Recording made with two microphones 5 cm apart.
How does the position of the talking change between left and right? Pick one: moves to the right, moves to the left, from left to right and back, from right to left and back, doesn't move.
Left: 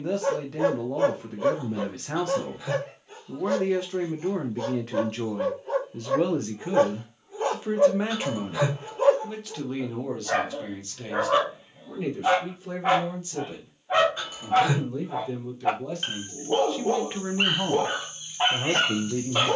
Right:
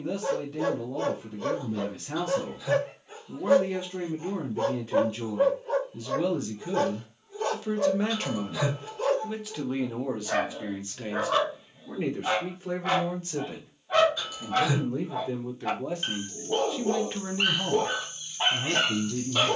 from left to right and back.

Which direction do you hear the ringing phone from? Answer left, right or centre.
left.